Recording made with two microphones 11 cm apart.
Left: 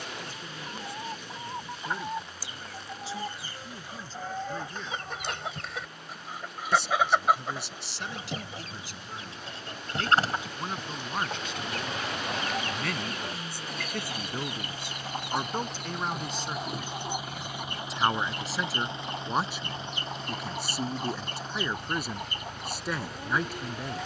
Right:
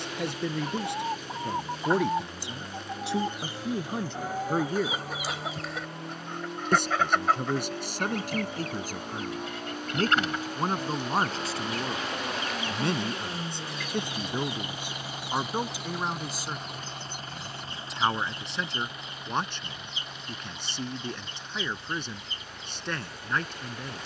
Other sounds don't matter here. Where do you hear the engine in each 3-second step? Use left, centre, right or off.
right, right, right, right, right, centre, left, left.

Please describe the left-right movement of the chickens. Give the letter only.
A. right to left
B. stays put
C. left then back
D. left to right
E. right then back
A.